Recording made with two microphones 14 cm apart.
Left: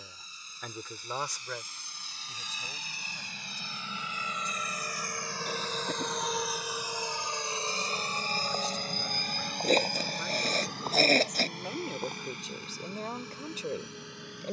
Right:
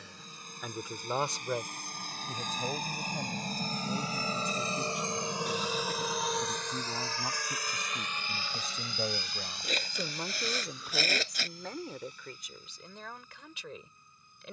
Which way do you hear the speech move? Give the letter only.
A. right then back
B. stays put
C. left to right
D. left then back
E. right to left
A.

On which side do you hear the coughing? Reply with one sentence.
You can hear the coughing on the left.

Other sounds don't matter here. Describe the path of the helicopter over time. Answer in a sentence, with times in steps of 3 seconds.
You can hear the helicopter on the right from 0 s and on the left from 6 s.